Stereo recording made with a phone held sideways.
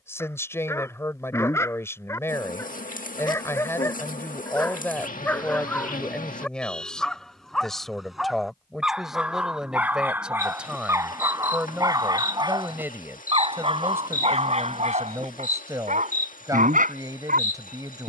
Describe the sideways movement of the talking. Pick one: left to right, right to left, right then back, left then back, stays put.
left to right.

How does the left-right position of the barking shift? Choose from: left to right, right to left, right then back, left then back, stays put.
left to right.